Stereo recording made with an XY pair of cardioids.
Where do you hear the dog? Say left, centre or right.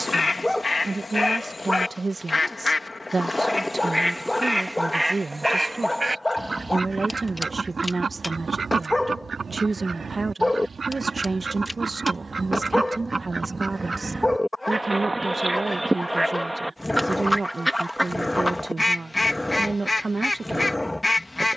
centre.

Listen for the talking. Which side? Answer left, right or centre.
right.